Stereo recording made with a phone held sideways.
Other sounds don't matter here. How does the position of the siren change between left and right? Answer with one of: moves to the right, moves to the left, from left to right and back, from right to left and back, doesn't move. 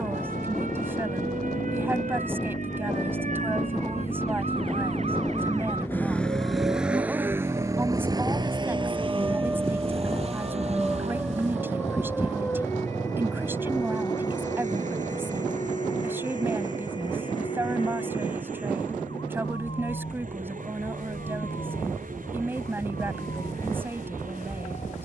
moves to the left.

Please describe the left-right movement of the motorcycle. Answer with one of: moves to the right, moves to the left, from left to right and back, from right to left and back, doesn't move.
moves to the right.